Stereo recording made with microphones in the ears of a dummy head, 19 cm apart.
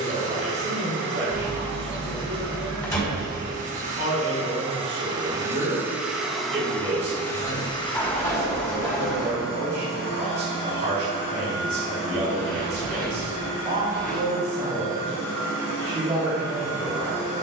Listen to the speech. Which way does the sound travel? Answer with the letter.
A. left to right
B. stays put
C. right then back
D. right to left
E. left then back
B.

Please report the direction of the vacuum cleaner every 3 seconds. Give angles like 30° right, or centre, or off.
50° right, 30° right, 20° left, 50° left, 60° left, 70° left.